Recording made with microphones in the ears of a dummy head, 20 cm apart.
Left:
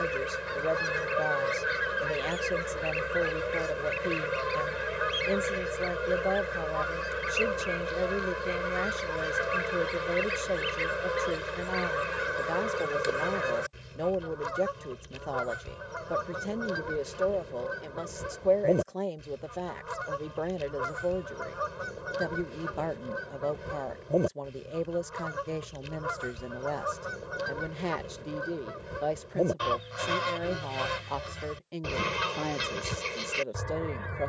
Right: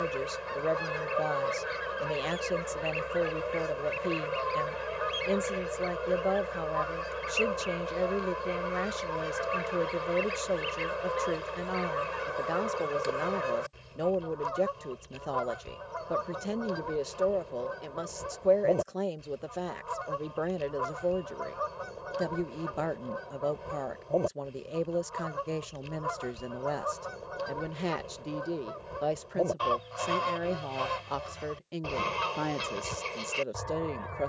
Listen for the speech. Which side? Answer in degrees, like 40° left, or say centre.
centre.